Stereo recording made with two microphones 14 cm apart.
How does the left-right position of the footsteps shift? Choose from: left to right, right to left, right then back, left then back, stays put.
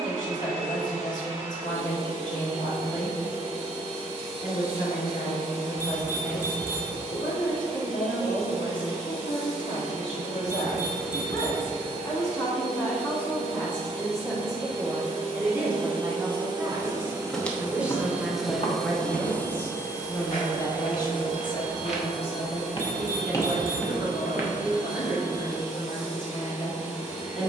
left then back.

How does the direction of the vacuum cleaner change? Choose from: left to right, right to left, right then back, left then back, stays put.
right to left.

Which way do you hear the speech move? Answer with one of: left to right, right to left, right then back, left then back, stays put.
right then back.